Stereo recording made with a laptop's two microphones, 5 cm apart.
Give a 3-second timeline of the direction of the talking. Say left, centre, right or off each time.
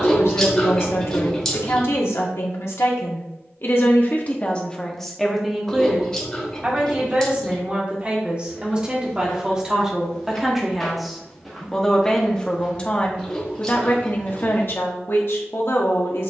left, left, right, centre, left, left.